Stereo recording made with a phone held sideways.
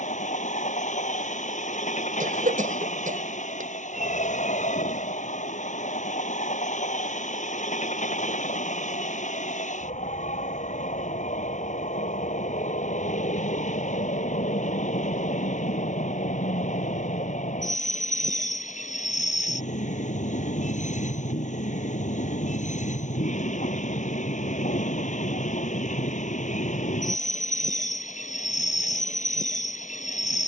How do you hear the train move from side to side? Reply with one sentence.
You can hear the train stay put.